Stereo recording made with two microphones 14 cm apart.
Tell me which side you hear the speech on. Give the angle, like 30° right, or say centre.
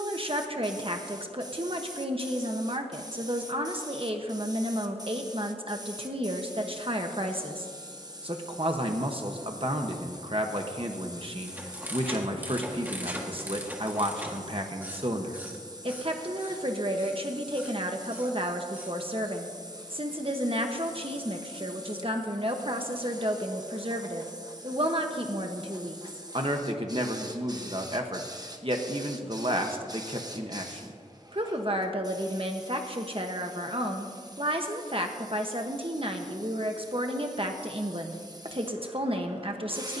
40° right.